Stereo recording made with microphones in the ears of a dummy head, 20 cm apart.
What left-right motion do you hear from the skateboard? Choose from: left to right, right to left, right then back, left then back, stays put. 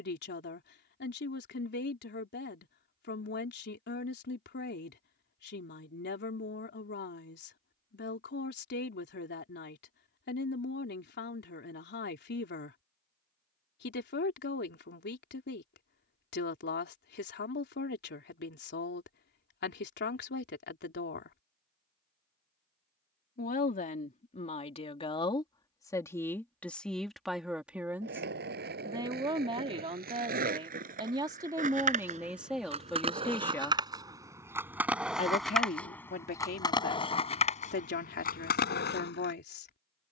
right to left.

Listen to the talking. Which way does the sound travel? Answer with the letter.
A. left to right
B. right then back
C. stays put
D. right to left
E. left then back
B.